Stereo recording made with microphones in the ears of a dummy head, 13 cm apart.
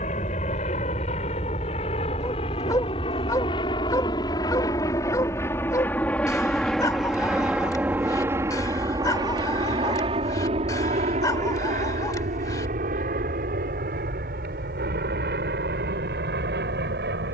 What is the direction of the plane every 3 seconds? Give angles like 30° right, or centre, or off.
50° left, 30° left, 10° right, 40° right, 60° right, 70° right.